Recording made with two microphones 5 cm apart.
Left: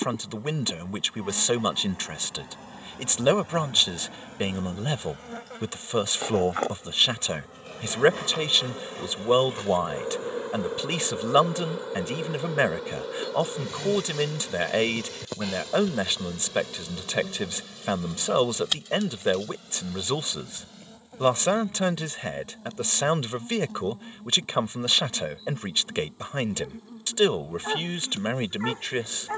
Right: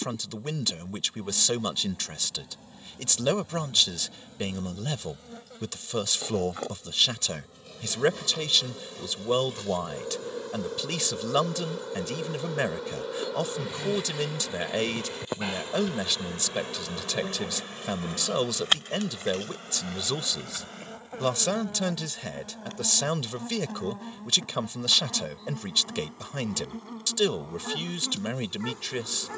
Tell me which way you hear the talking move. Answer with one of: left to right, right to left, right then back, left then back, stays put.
stays put.